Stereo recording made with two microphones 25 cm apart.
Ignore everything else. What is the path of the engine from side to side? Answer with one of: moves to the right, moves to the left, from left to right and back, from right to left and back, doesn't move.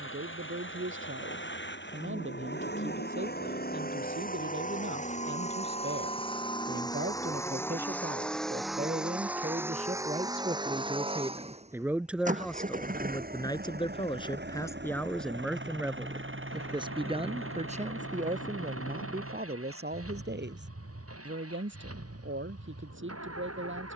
moves to the right.